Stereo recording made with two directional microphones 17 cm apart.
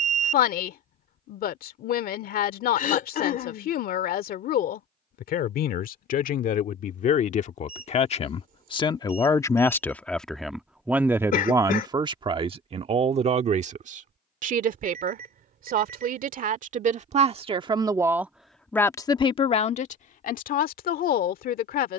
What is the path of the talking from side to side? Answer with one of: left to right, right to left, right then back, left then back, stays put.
right then back.